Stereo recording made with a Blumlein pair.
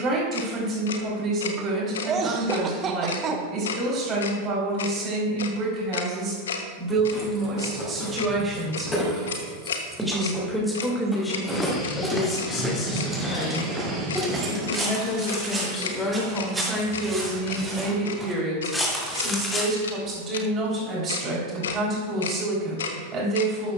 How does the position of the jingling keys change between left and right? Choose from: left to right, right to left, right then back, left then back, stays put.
left to right.